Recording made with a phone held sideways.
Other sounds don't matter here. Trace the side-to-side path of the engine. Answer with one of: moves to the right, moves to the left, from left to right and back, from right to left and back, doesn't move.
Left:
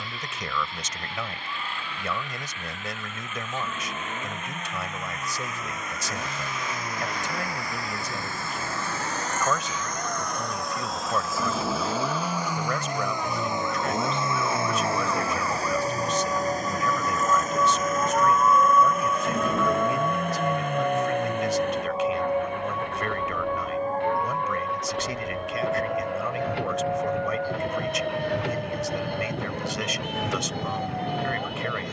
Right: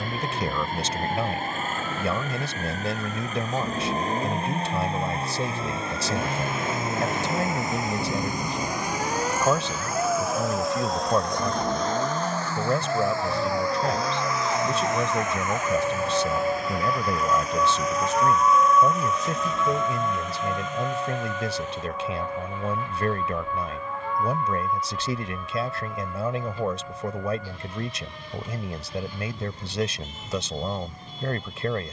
moves to the left.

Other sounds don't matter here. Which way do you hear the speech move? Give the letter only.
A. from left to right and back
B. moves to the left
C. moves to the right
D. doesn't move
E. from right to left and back
D.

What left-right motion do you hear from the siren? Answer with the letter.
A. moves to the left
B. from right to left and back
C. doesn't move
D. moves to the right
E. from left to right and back
A.